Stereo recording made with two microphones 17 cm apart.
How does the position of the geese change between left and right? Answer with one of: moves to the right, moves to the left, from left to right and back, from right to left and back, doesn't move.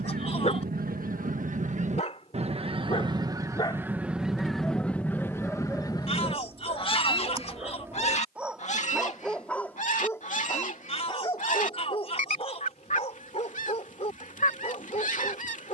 moves to the left.